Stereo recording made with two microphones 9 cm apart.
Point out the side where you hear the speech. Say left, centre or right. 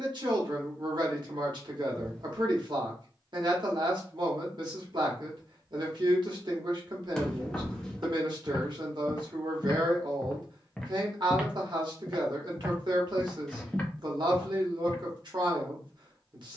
right.